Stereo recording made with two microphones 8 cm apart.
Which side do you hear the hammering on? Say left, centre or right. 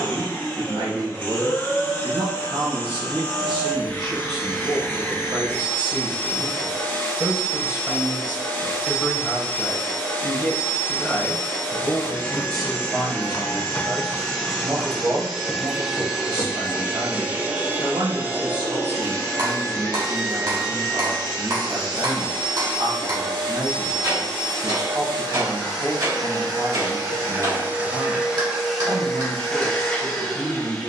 right.